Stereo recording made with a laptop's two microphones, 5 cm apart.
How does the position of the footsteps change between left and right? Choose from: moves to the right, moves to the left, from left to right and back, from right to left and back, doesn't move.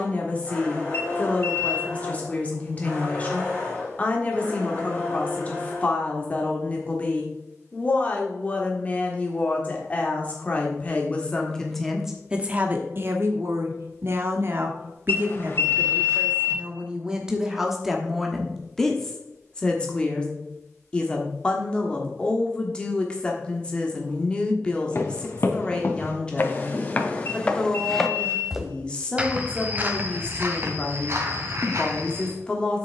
moves to the right.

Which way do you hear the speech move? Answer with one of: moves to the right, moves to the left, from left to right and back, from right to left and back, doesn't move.
from left to right and back.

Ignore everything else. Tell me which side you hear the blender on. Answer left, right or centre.
left.